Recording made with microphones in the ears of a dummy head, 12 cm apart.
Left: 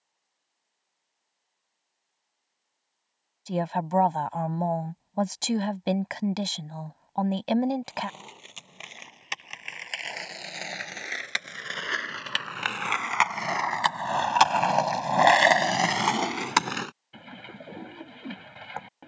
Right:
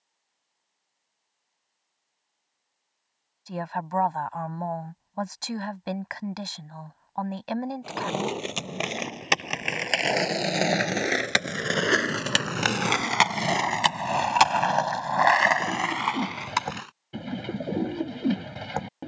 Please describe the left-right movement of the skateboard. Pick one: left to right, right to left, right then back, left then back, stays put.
right to left.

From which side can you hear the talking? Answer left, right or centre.
left.